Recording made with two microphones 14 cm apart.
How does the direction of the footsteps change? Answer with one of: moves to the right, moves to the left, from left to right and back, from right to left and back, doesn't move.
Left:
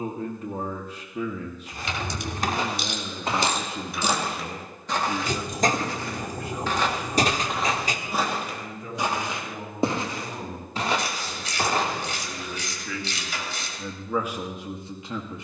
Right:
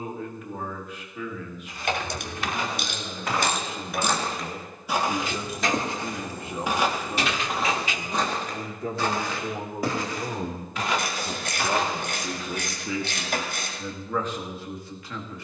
from left to right and back.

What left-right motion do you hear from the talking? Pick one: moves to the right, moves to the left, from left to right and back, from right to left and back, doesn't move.
from left to right and back.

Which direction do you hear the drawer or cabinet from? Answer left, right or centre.
left.